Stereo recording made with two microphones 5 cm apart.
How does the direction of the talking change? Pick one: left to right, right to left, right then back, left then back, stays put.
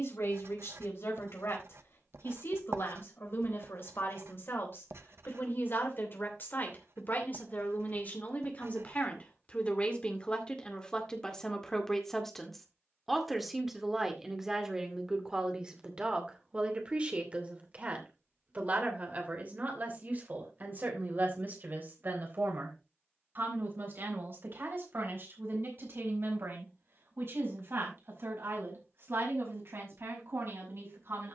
left to right.